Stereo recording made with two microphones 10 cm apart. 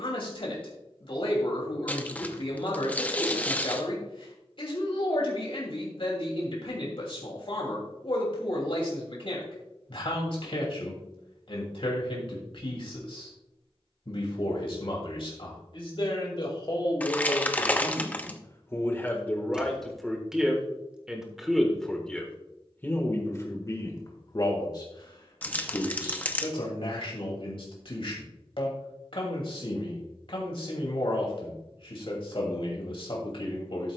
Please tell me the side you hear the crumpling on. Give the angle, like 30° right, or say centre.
20° left.